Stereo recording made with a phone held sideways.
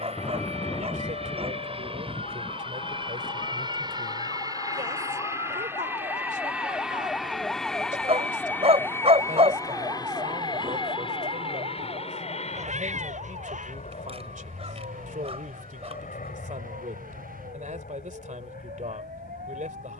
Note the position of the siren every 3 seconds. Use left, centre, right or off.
left, left, centre, right, right, right, right.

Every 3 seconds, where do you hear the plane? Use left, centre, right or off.
right, right, centre, left, left, left, left.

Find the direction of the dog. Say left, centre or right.
right.